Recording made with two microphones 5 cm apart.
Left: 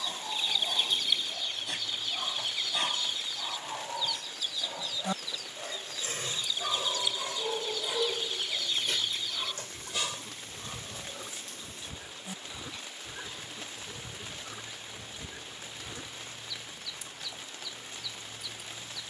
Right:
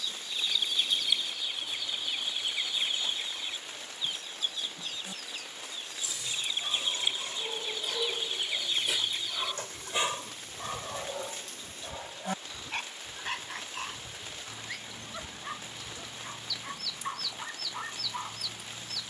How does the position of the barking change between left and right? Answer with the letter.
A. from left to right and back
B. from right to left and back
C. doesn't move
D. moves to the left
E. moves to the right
E.